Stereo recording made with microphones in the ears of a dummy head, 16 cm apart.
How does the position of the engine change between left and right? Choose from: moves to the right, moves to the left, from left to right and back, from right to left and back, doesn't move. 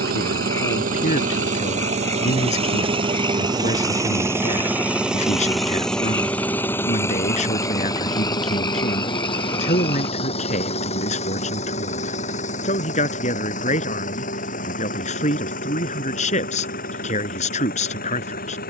moves to the left.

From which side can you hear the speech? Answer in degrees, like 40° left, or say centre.
40° left.